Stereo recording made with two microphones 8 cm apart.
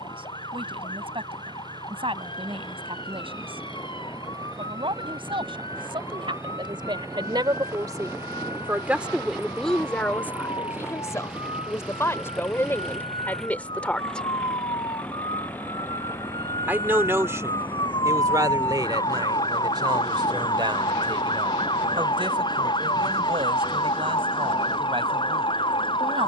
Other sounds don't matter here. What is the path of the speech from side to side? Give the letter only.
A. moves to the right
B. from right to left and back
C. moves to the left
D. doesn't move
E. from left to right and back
B.